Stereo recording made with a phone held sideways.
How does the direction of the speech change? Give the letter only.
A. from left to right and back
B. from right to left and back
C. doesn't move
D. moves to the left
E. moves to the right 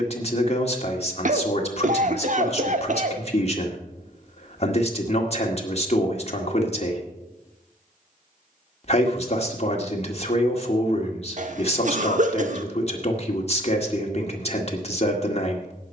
C.